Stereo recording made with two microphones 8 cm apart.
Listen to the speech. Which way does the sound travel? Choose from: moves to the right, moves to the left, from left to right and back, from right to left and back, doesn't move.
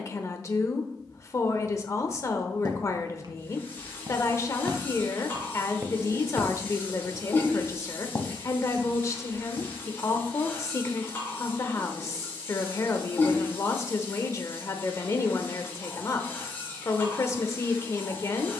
doesn't move.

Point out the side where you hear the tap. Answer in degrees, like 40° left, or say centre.
30° left.